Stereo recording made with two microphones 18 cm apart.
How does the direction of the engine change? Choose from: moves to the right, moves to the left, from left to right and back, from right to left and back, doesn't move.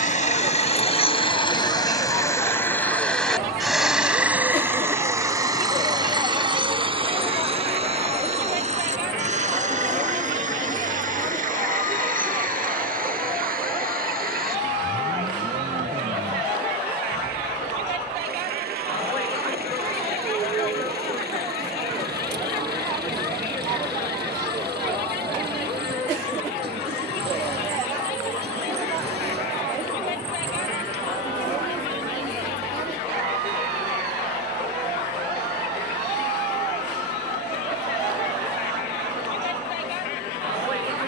moves to the right.